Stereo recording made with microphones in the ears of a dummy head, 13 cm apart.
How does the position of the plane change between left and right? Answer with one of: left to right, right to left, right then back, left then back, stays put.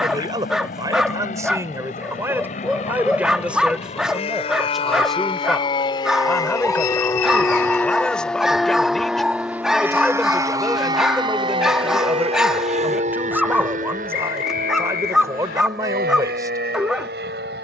left to right.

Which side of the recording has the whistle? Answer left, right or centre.
left.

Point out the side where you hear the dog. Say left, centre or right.
centre.